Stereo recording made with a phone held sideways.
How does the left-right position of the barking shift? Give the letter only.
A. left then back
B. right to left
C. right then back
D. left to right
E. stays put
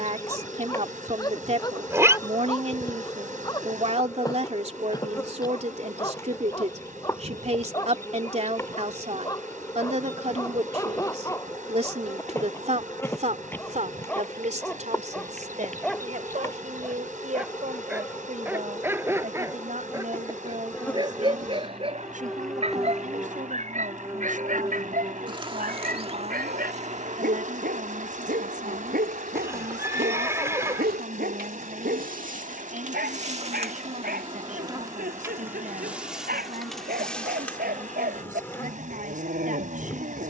D.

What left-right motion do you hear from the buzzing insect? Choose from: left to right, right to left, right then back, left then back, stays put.
right then back.